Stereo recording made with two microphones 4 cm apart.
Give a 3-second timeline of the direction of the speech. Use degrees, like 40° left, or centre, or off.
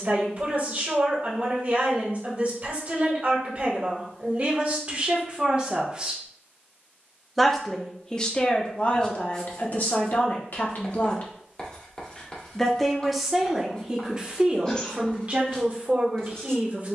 40° right, 40° right, 10° left, 50° left, 10° right, 40° right.